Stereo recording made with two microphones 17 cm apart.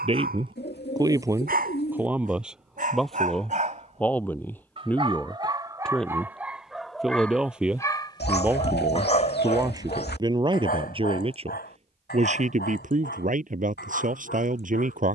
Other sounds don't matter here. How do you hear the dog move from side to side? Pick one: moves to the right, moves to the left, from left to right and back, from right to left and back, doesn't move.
moves to the left.